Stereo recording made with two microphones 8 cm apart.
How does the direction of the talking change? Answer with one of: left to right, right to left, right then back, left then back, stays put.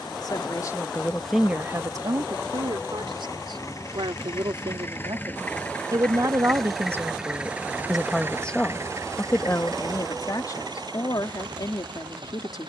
right then back.